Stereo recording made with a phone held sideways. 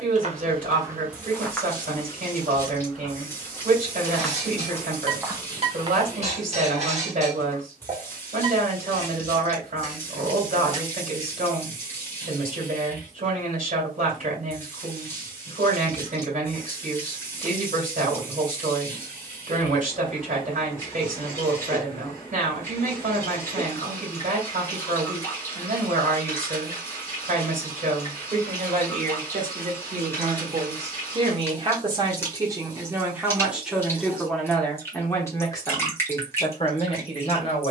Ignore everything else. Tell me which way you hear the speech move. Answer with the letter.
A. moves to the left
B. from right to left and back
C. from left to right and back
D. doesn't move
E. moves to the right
A.